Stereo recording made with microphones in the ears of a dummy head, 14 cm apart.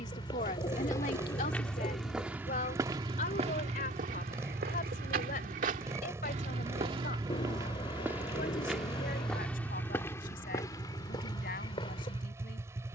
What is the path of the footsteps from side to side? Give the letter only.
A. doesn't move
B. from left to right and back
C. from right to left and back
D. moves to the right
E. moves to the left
B.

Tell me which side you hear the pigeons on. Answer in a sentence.
In this clip you hear the pigeons on the left.